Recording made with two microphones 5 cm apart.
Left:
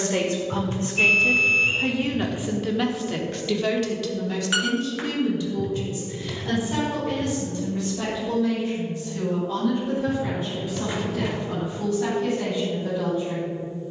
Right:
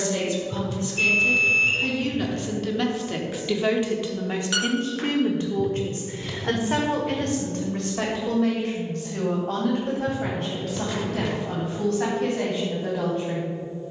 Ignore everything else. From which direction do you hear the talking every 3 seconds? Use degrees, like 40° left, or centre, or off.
30° left, 30° right, 60° right, 70° right, 70° right.